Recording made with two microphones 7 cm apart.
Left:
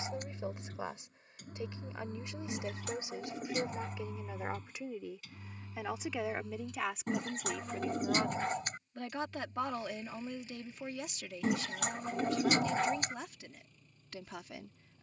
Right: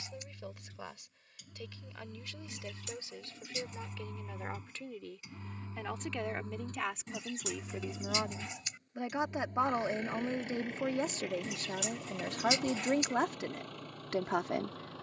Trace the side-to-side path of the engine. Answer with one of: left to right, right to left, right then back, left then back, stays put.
left to right.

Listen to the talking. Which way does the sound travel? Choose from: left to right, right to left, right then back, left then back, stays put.
left to right.